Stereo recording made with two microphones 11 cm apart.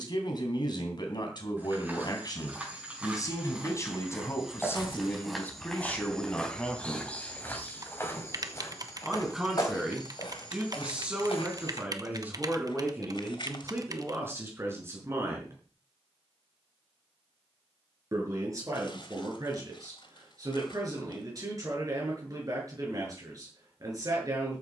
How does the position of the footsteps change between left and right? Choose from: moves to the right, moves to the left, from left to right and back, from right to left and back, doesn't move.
moves to the left.